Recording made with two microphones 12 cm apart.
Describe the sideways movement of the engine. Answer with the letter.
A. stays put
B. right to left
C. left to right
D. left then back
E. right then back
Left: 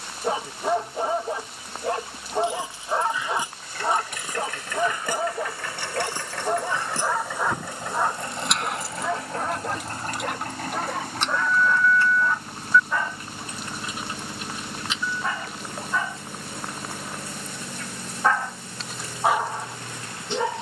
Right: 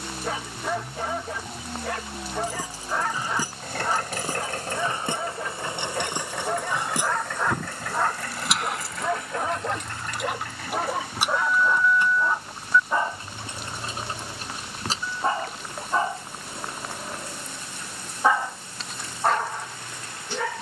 B.